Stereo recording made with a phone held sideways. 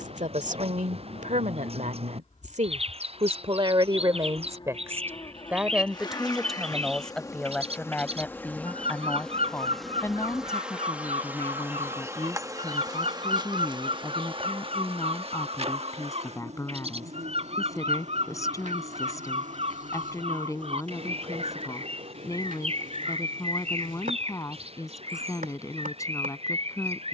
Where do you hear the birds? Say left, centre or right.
right.